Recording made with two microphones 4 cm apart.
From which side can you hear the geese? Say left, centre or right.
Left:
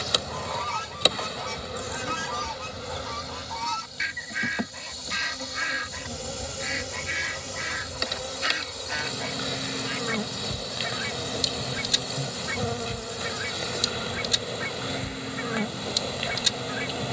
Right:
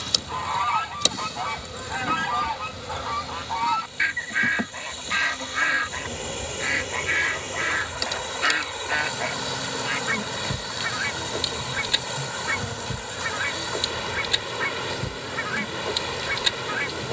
right.